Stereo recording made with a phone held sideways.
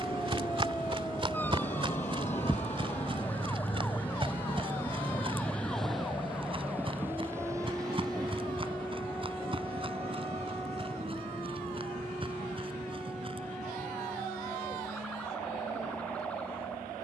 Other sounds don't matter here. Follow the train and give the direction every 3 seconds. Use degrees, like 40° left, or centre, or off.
50° left, 20° left, 20° right, 40° right, 50° right, 60° right.